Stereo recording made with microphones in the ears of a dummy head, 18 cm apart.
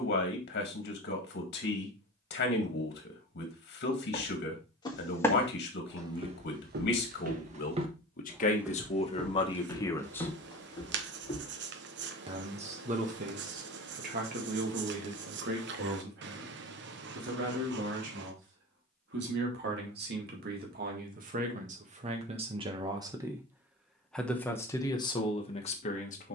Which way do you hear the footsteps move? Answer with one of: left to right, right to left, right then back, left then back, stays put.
right then back.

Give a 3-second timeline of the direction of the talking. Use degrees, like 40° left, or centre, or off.
50° left, 50° left, 50° left, 20° left, 40° right, 60° right, 60° right, 30° right, 20° left.